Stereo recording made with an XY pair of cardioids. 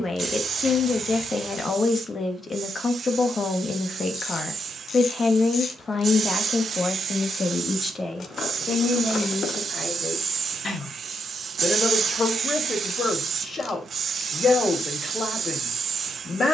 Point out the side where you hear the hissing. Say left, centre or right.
right.